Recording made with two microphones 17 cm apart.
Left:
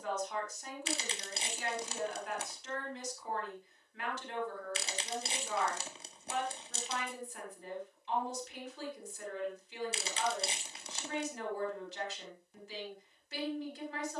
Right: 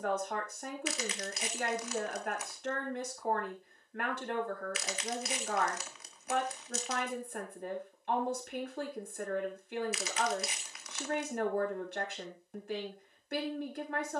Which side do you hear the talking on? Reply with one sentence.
You can hear the talking on the right.